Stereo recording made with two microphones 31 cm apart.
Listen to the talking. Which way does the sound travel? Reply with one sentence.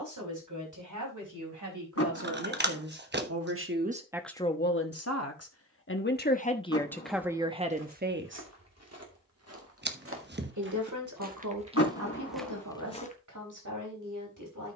In this clip you hear the talking go left and come back.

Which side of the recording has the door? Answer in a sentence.
You can hear the door on the left.